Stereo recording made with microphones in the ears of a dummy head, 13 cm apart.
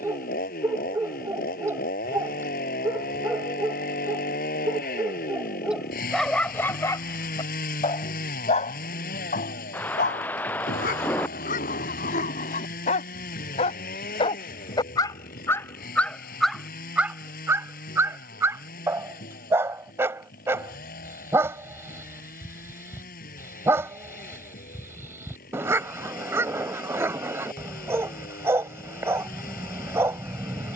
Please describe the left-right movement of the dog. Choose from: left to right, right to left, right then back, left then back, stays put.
left then back.